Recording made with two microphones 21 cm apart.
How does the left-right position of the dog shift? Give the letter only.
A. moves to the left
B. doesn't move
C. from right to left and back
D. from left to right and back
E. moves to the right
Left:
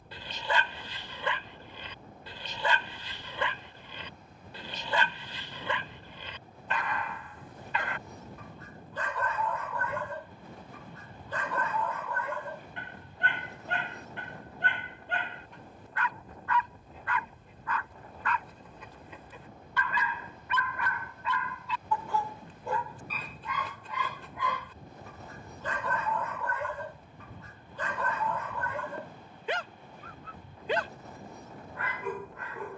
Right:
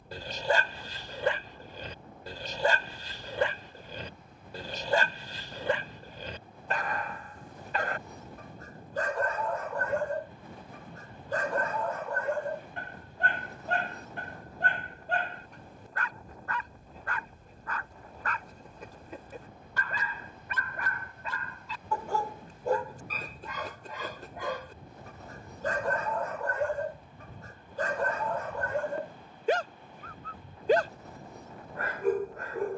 B.